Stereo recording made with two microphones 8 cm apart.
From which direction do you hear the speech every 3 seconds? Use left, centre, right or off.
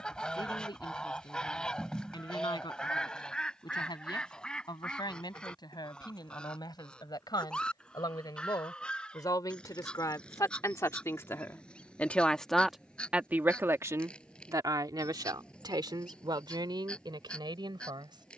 left, left, left, left, right, right.